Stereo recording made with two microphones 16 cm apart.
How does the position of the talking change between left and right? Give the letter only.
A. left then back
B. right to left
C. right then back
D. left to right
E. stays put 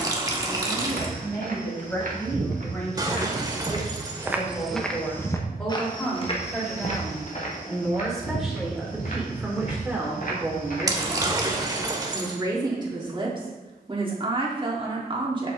D.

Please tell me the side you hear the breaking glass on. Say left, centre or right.
right.